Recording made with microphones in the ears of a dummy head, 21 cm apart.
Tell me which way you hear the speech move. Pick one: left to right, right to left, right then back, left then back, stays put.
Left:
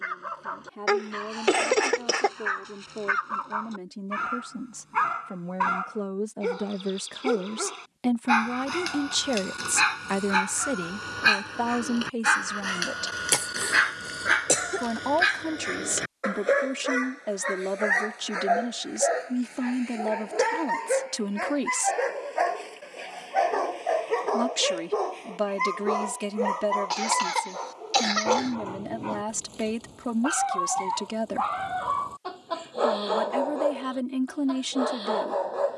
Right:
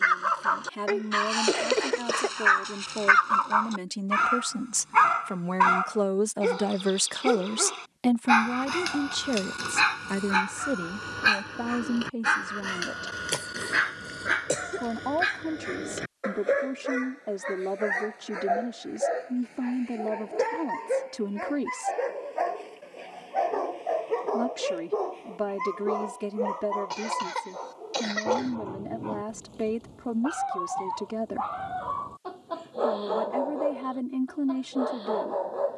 right to left.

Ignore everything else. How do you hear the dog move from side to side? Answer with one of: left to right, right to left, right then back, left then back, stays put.
right to left.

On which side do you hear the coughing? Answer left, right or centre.
left.